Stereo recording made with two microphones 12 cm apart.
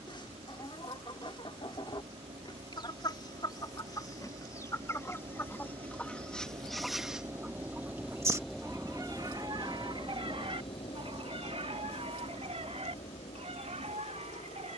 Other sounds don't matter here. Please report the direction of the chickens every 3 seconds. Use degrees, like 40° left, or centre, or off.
50° left, 30° left, 10° right, 50° right, 70° right.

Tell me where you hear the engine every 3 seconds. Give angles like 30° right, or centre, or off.
60° right, 50° right, 20° right, 40° left, 70° left.